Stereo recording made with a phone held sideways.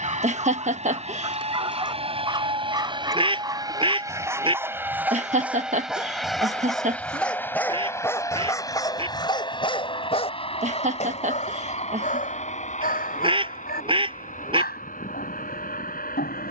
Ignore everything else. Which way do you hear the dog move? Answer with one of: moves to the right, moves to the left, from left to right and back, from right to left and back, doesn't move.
moves to the left.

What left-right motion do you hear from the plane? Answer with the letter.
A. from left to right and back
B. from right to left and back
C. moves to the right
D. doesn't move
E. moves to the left
E.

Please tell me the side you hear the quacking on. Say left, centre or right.
right.